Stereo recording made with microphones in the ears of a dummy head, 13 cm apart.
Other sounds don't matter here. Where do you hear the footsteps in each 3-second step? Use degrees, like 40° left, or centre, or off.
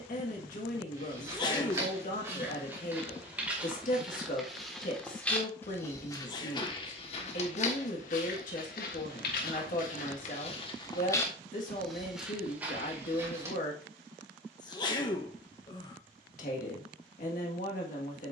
20° right, centre, 50° left, 50° left, 10° right, off.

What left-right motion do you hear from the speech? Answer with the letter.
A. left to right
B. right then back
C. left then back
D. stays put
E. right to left
D.